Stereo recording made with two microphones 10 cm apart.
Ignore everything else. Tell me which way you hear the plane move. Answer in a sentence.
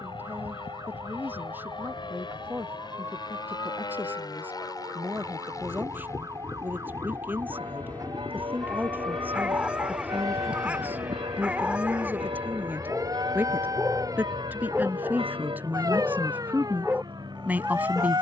You can hear the plane go from the left side to the right.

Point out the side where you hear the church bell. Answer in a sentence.
In this clip you hear the church bell on the right.